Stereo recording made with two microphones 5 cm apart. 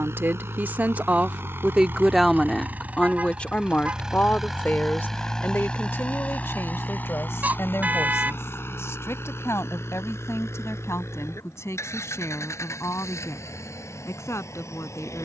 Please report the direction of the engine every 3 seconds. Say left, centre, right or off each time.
right, centre, left, left, left.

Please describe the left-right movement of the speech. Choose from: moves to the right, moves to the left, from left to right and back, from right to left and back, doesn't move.
moves to the left.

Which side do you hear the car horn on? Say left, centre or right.
right.